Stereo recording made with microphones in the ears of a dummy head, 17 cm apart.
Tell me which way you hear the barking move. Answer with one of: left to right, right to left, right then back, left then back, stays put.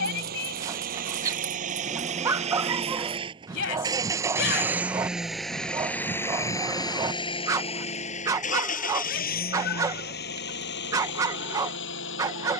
stays put.